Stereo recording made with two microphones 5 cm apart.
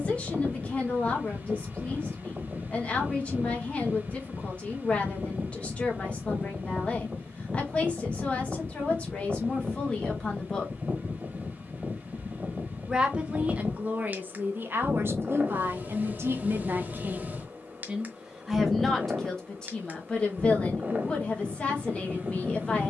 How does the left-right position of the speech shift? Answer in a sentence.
You can hear the speech go right and come back.